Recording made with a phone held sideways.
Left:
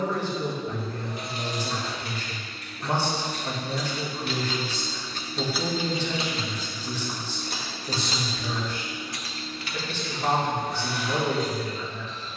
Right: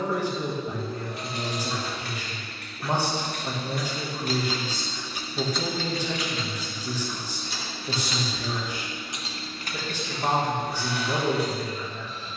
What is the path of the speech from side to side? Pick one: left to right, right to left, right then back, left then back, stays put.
stays put.